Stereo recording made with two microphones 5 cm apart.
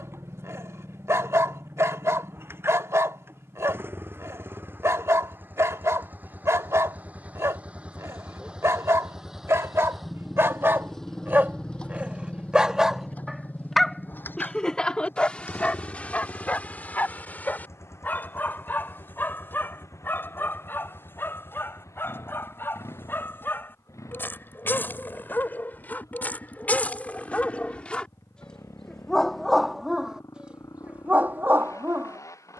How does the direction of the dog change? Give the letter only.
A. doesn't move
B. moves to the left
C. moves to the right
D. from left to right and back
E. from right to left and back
E.